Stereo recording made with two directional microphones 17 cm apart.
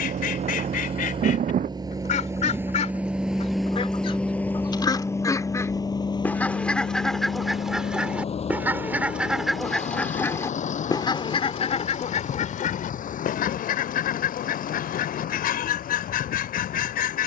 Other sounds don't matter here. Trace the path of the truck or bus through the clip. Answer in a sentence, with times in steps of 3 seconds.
You can hear the truck or bus on the right from 0 s, in the centre from 3 s and on the left from 6 s.